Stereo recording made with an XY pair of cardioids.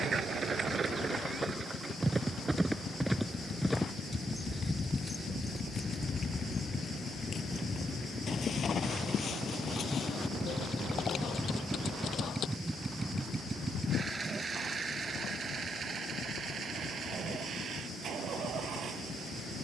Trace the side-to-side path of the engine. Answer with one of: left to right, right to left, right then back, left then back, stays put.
left to right.